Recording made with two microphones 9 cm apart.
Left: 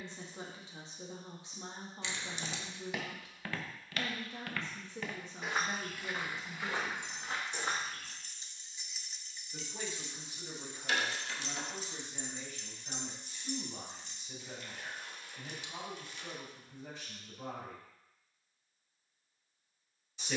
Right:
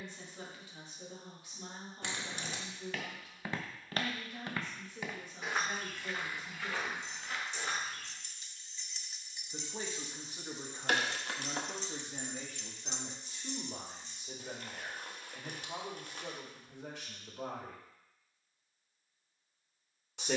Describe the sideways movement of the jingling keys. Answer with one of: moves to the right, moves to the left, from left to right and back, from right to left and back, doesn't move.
from left to right and back.